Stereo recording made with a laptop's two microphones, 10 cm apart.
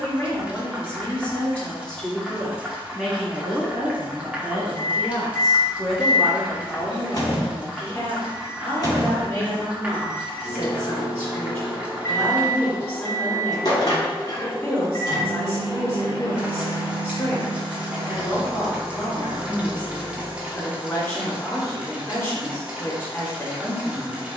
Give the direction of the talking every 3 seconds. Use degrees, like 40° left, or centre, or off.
10° left, 10° right, 20° left, 20° left, 20° left, 20° left, 20° left, 20° left.